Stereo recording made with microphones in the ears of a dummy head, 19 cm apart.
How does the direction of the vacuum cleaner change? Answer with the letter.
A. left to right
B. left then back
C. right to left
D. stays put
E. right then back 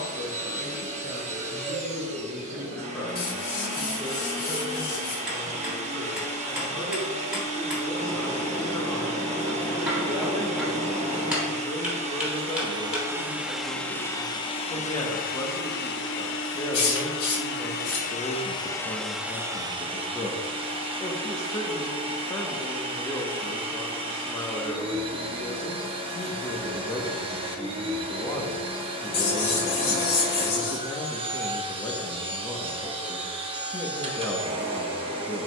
B.